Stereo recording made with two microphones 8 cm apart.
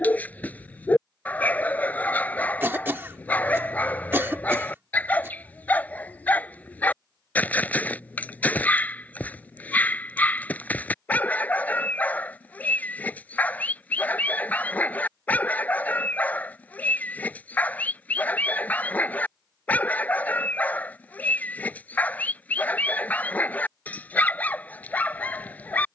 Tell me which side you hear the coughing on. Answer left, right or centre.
right.